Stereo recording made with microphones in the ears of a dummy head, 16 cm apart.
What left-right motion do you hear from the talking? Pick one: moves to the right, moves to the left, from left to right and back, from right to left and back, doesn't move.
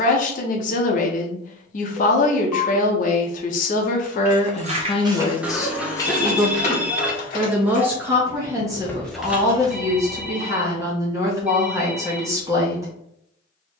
moves to the right.